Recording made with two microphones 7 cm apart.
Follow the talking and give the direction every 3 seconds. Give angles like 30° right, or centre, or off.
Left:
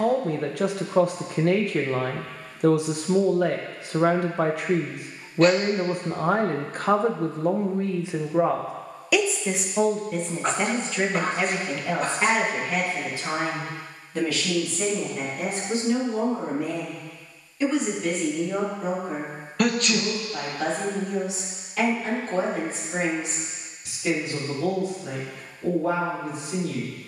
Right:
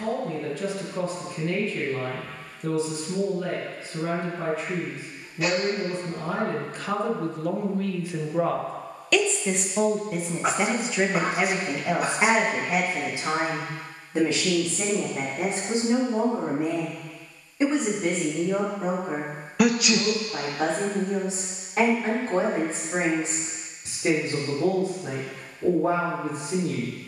70° left, 70° left, 40° left, 10° right, 20° right, 30° right, 30° right, 40° right, 40° right.